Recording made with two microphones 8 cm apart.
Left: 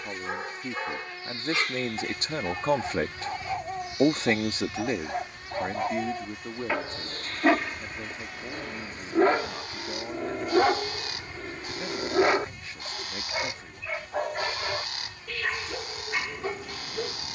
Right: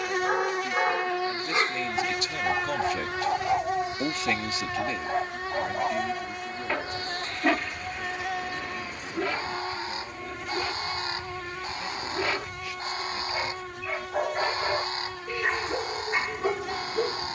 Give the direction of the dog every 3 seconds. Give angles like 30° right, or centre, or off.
30° right, 20° right, 20° left, 50° left, 10° left, 20° right.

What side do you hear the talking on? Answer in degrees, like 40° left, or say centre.
30° left.